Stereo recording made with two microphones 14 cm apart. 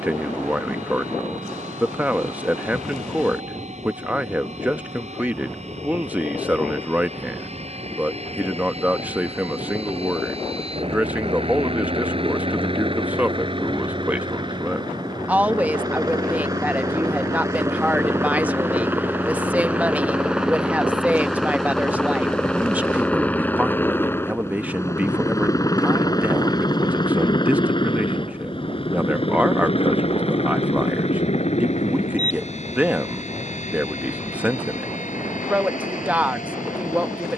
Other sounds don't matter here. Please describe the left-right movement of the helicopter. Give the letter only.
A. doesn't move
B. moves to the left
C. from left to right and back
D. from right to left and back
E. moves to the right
B.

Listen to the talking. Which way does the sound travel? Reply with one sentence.
You can hear the talking stay in one place.